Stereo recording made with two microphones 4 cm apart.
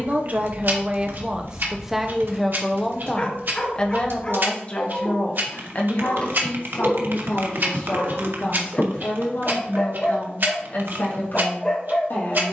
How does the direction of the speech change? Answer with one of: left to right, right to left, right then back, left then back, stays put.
right to left.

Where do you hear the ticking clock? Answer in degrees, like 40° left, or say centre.
60° right.